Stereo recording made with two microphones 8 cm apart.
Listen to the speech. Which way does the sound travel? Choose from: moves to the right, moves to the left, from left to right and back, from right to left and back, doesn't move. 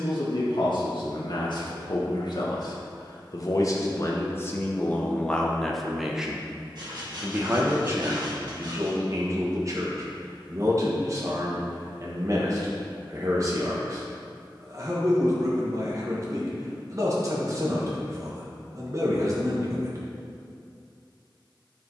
moves to the right.